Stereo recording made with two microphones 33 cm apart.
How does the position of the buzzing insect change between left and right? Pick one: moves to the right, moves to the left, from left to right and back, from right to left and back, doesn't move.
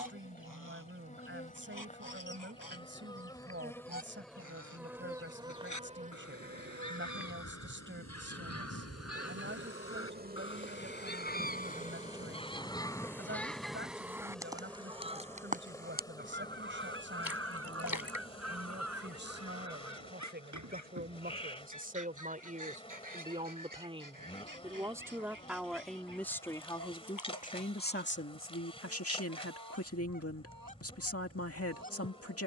from left to right and back.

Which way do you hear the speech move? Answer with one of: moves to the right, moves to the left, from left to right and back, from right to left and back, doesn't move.
moves to the left.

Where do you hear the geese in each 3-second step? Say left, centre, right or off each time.
left, left, left, left, centre, right, right, right, right, right, right.